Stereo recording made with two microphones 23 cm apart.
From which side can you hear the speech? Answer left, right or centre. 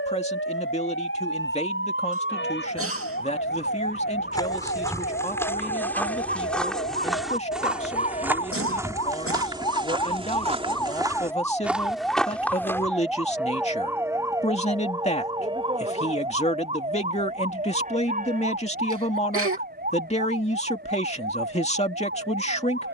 left.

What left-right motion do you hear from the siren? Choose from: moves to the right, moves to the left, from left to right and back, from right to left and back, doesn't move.
moves to the right.